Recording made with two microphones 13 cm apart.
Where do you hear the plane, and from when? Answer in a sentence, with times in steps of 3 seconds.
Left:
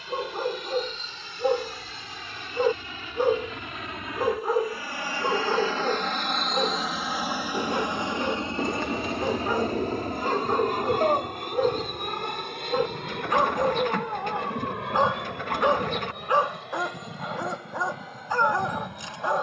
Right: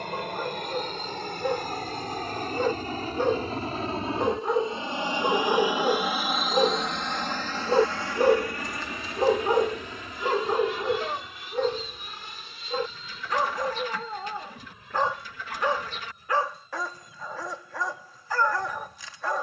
In this clip you hear the plane on the right from 0 s, in the centre from 6 s and on the left from 9 s.